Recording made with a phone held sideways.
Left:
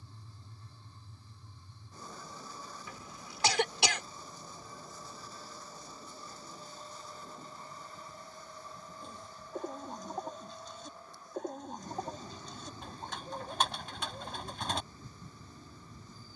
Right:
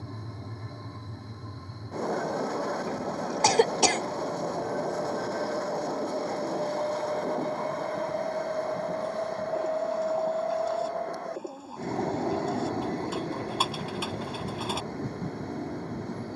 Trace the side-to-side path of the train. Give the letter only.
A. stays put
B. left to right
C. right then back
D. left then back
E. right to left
A.